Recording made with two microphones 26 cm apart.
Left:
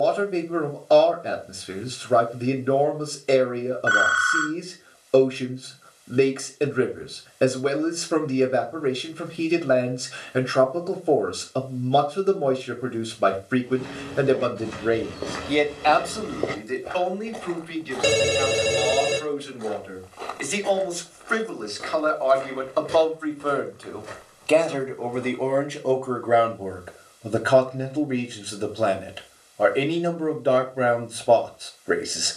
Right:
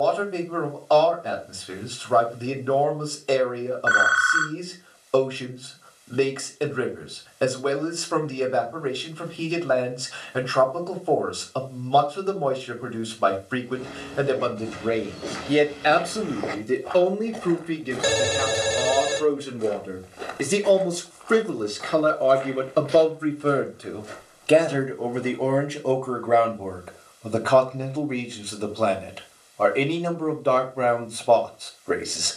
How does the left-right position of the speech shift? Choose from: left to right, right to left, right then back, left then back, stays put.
right then back.